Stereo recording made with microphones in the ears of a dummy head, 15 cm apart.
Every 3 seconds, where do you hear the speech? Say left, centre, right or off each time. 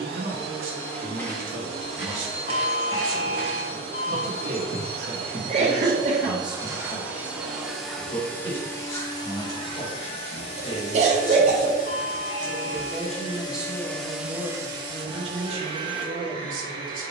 right, right, centre, left, centre, right.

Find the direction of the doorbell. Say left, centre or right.
left.